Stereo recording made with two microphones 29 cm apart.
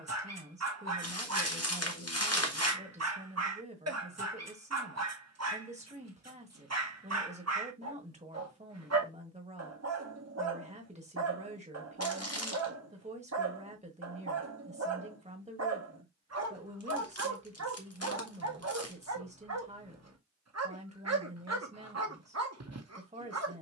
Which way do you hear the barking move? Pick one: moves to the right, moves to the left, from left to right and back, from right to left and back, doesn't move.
doesn't move.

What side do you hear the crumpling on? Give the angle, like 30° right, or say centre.
60° left.